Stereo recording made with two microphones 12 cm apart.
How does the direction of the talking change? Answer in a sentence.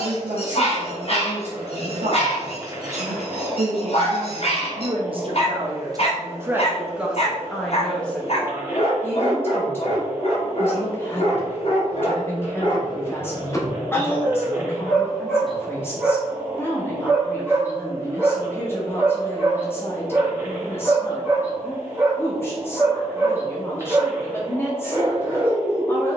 In this clip you hear the talking travel towards the left.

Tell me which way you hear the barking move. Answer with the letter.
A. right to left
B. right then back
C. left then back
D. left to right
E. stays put
D.